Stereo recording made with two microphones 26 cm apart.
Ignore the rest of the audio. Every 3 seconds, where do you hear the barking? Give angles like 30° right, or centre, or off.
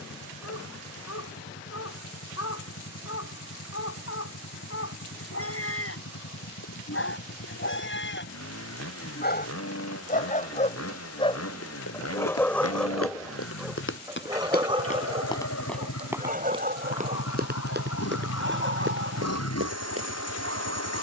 70° left, 60° left, 50° left, 30° left, centre, 30° right, 50° right.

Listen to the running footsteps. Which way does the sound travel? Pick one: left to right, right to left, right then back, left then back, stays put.
left to right.